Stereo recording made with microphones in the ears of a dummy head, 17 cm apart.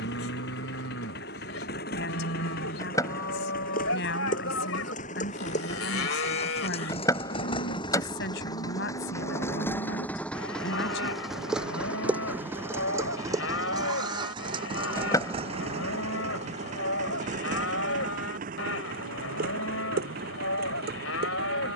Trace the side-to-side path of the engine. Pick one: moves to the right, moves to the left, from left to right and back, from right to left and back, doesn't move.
moves to the right.